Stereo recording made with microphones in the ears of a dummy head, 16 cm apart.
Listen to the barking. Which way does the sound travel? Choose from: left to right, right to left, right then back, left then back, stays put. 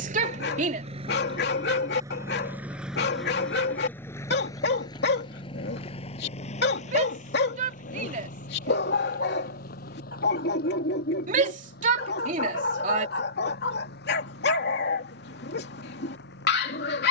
stays put.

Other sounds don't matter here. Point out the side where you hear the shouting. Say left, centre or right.
right.